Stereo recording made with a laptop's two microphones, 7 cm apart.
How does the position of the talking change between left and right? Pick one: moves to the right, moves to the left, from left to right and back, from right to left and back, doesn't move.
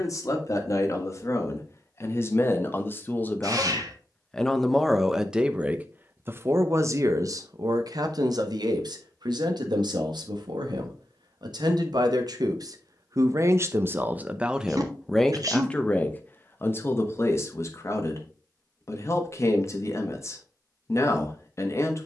from left to right and back.